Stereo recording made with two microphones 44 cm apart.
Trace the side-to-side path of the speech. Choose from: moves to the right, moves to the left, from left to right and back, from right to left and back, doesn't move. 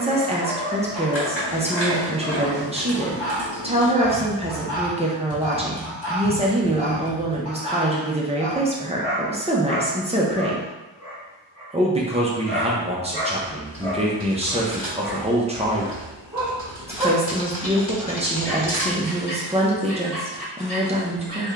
doesn't move.